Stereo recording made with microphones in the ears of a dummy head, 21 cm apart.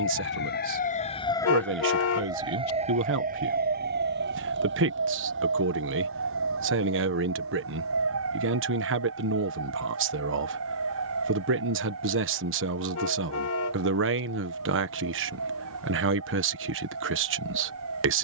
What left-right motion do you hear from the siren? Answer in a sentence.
In this clip you hear the siren travel towards the right.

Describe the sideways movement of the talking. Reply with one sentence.
You can hear the talking stay put.